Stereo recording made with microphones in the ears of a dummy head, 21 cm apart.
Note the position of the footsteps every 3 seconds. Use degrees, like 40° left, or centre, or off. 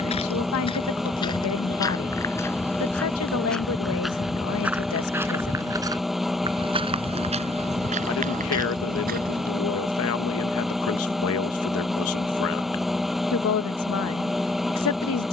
20° left, centre, 30° right, 40° right, off.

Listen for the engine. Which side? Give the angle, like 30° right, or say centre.
centre.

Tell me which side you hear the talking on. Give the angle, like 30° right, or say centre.
70° left.